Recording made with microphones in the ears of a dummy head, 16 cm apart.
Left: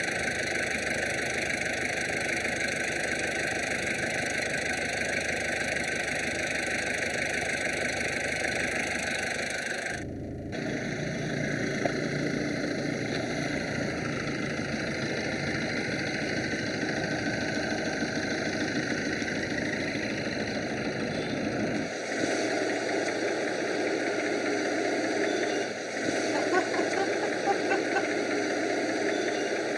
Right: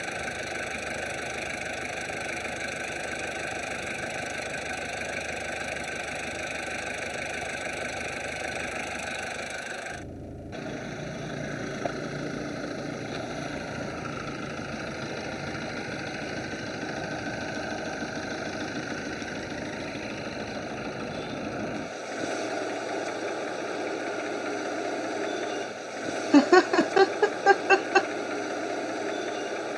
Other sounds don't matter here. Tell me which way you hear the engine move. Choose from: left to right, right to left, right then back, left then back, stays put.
stays put.